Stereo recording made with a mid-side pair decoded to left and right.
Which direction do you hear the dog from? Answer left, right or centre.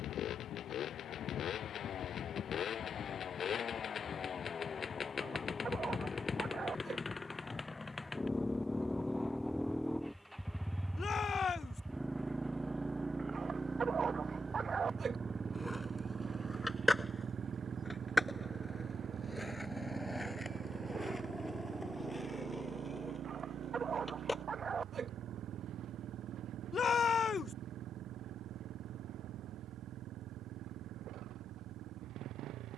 right.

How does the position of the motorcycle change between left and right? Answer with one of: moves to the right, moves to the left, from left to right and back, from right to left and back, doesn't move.
moves to the right.